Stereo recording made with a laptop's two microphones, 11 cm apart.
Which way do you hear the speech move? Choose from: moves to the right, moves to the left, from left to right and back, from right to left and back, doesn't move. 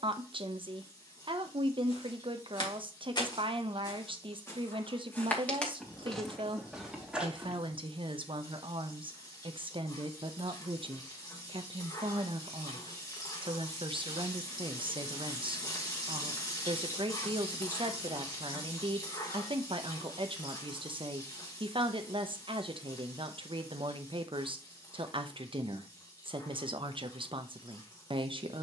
doesn't move.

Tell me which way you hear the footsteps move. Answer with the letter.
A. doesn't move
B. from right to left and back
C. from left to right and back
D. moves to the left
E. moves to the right
E.